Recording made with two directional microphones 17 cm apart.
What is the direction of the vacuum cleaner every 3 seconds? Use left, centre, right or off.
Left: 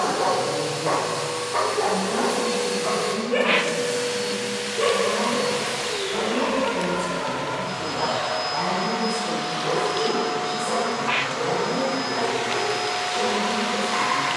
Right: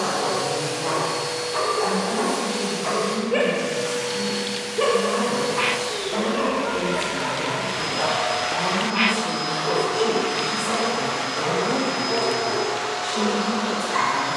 centre, centre, right, right, right.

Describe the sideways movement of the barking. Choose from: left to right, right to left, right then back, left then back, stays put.
left to right.